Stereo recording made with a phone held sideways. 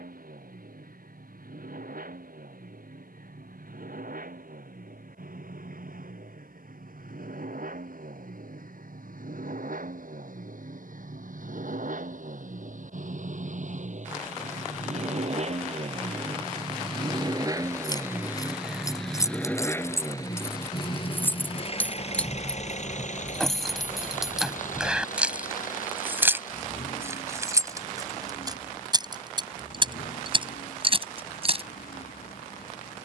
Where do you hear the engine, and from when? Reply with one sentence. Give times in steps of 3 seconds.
You can hear the engine on the right from 0 s, in the centre from 18 s and on the left from 21 s.